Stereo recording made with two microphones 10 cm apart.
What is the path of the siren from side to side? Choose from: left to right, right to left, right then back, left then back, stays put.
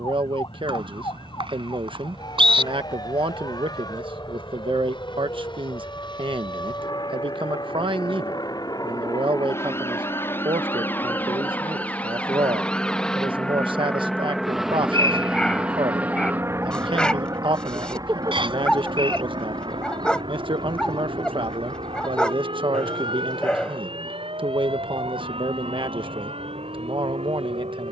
left to right.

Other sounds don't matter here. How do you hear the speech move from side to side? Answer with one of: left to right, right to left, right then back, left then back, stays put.
stays put.